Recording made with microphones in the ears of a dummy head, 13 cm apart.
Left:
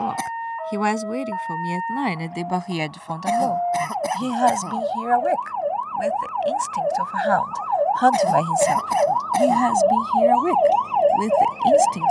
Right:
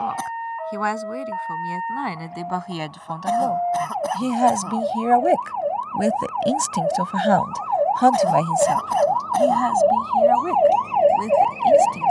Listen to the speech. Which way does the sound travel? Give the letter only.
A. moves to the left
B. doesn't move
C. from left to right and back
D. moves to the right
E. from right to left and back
C.